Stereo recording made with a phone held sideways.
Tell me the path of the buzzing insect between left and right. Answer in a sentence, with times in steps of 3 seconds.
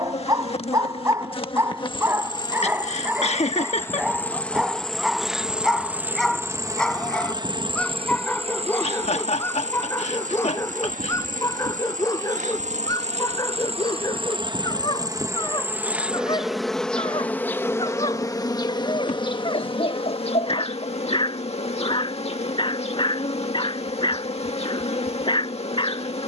You can hear the buzzing insect on the left from 0 s, in the centre from 3 s, on the right from 6 s, in the centre from 15 s and on the left from 18 s.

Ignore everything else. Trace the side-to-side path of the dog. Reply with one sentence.
In this clip you hear the dog travel towards the left.